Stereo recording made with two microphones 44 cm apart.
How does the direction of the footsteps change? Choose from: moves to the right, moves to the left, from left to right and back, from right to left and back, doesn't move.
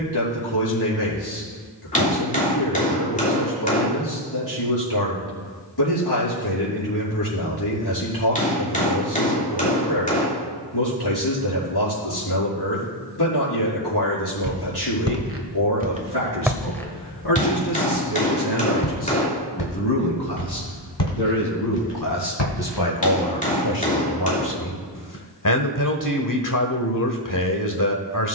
moves to the left.